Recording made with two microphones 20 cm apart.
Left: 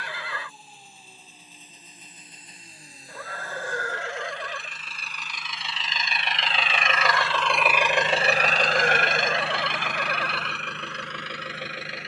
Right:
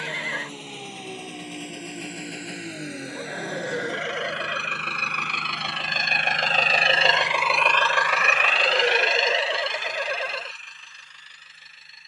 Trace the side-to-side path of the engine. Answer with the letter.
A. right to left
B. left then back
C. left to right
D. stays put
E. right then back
A.